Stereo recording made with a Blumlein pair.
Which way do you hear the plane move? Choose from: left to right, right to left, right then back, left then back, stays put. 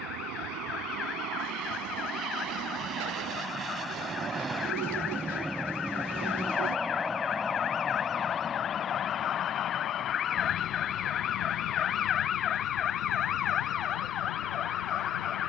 right to left.